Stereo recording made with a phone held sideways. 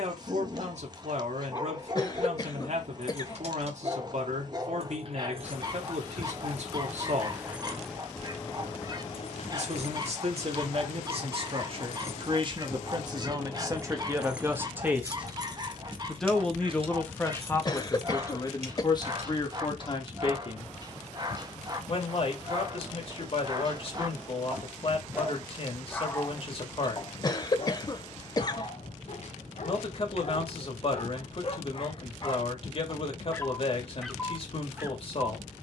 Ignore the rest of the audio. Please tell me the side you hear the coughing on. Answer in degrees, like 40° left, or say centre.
30° left.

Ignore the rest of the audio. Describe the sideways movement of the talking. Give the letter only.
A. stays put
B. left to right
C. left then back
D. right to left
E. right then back
D.